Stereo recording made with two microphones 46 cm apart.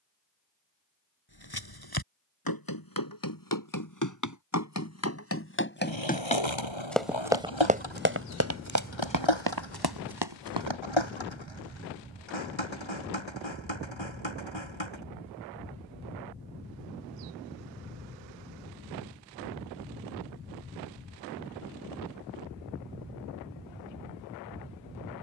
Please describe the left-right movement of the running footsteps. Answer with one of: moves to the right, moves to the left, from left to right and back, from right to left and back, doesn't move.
moves to the right.